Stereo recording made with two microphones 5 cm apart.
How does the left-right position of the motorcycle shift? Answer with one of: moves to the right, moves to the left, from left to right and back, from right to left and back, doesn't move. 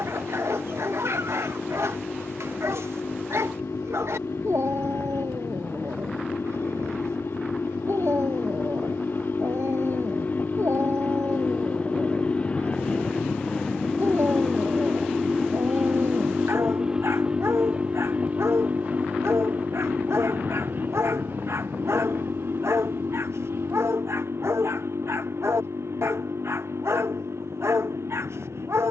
moves to the right.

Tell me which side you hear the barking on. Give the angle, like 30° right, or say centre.
70° right.